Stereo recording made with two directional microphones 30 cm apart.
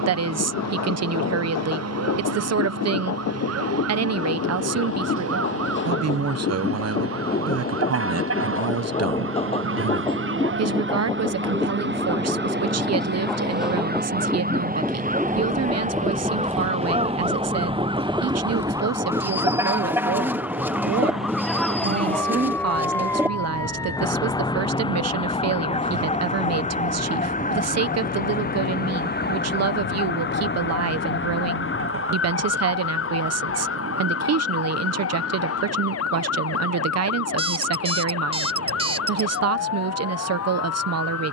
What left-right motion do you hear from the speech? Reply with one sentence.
You can hear the speech stay put.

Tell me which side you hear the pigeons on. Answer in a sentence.
You can hear the pigeons in the centre.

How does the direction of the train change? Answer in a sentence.
You can hear the train go from the left side to the right.